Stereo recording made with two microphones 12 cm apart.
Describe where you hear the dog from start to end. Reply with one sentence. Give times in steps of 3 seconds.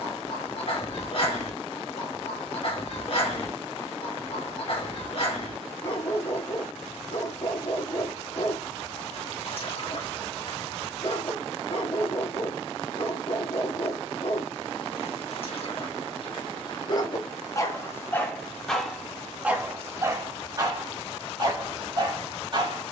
You can hear the dog on the left from 0 s, in the centre from 18 s and on the right from 21 s.